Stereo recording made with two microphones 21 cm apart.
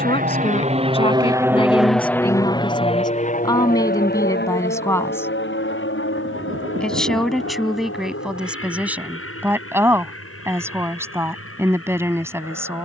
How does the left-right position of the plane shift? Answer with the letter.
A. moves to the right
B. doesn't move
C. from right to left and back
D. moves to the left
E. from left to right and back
D.